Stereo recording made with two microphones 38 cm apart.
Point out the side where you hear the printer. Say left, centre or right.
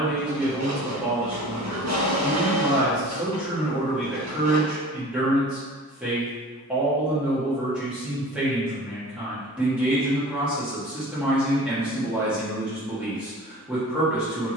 right.